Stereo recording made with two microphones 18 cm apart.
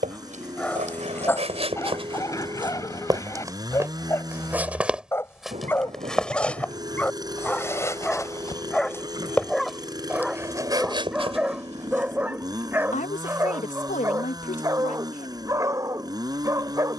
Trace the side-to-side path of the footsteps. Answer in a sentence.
You can hear the footsteps go left and come back.